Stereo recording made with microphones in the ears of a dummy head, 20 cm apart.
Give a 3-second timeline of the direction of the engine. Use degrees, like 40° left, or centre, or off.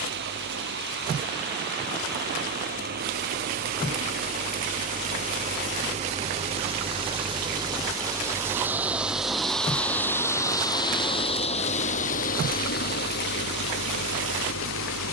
50° right, 40° right, 20° right, 10° left, 50° left.